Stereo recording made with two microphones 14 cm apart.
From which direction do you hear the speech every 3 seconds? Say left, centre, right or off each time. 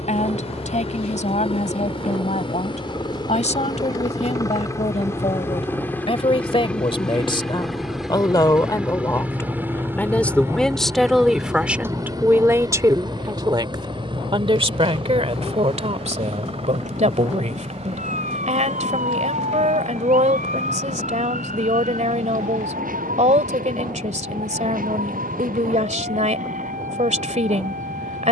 left, left, left, centre, right, right, right, right, right, right.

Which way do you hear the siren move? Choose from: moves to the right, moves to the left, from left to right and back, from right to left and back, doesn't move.
moves to the right.